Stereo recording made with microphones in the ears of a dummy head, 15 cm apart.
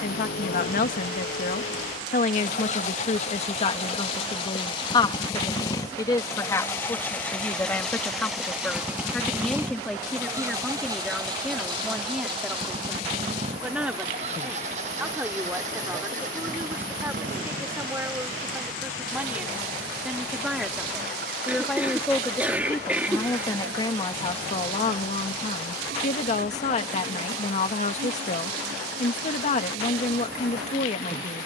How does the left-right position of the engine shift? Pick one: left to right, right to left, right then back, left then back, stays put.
left to right.